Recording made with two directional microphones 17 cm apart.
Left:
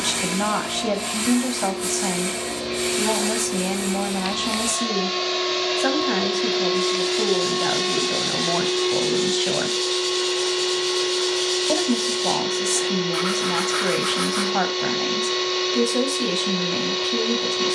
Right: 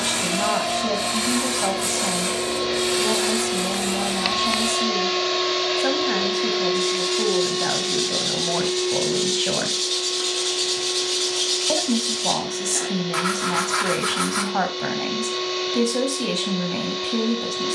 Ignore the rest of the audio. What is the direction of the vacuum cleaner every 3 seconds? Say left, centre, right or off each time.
right, right, left, left, left, left.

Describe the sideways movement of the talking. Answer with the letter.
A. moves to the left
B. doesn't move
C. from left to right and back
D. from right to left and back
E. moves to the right
B.